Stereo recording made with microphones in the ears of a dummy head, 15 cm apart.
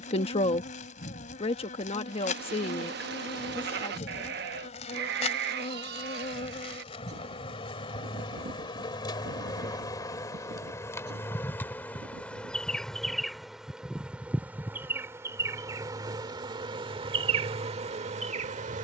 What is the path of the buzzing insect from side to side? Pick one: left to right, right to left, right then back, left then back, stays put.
left to right.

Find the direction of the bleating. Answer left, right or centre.
right.